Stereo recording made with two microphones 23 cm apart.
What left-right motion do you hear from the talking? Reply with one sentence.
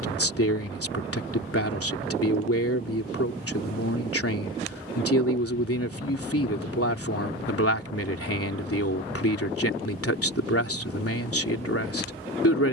In this clip you hear the talking stay put.